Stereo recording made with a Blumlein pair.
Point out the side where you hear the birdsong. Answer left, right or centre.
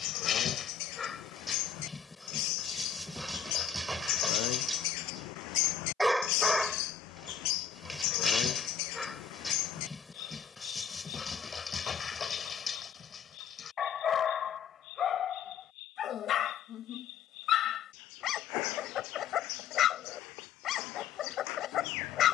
left.